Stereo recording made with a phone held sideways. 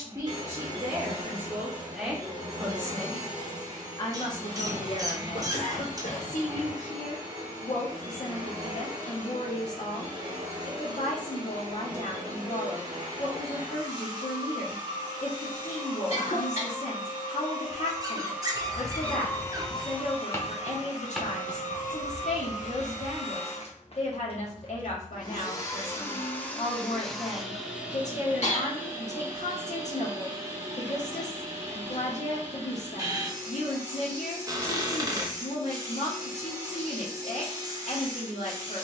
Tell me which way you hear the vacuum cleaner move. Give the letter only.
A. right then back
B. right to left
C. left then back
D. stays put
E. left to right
C.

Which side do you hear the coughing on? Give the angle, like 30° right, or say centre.
60° left.